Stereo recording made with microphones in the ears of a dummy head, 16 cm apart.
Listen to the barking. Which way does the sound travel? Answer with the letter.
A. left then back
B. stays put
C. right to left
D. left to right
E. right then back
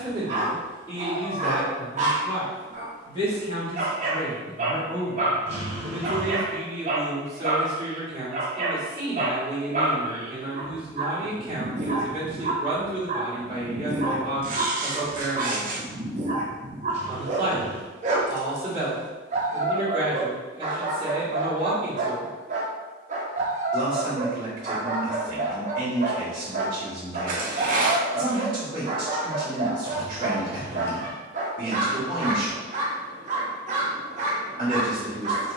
B.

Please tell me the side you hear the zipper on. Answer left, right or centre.
right.